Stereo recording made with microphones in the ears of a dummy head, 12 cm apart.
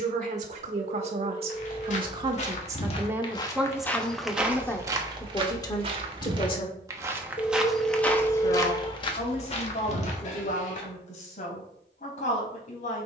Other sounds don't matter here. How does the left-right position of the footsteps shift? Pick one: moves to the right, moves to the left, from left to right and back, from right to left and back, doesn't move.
from left to right and back.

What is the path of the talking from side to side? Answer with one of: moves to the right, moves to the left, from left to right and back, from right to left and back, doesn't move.
moves to the left.